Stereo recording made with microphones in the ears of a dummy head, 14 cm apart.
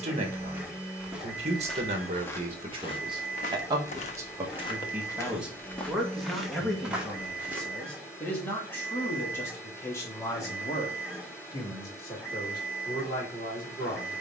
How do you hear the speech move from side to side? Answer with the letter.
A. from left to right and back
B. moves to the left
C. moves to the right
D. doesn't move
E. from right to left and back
B.